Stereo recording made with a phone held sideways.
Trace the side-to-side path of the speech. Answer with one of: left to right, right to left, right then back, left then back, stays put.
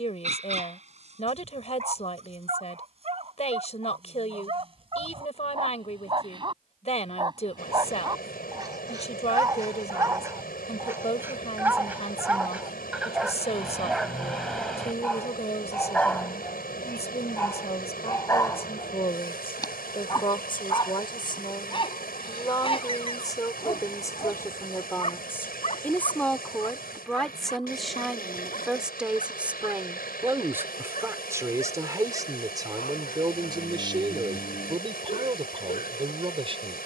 left to right.